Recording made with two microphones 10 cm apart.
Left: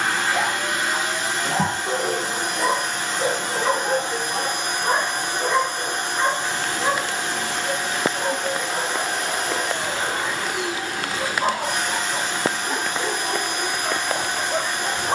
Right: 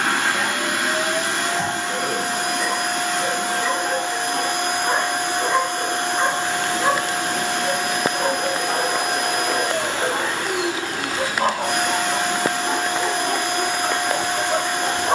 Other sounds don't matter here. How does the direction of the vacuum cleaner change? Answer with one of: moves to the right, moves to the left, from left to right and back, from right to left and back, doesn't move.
doesn't move.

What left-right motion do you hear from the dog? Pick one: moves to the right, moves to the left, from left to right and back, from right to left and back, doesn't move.
moves to the right.